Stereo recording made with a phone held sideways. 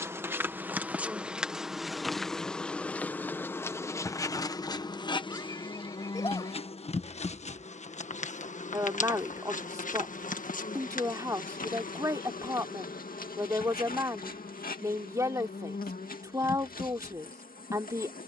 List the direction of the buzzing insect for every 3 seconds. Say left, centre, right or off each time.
centre, left, left, left, left, left.